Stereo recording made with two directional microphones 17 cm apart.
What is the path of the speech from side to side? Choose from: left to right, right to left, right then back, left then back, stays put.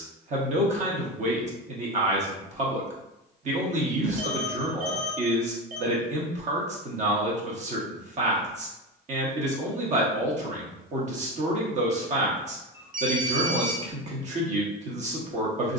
stays put.